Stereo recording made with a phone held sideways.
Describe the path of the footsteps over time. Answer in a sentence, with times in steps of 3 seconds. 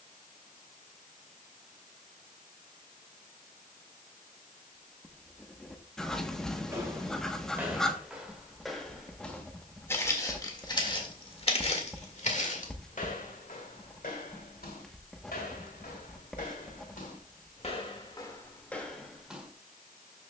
In this clip you hear the footsteps not at all from 0 s, in the centre from 6 s, on the left from 9 s and in the centre from 18 s.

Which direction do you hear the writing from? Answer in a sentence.
You can hear the writing in the centre.